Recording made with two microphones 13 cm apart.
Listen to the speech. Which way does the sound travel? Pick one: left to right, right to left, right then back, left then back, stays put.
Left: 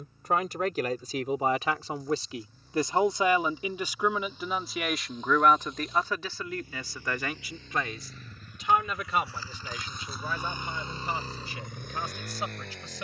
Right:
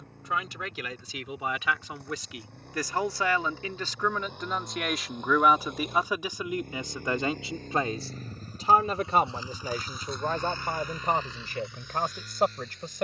left to right.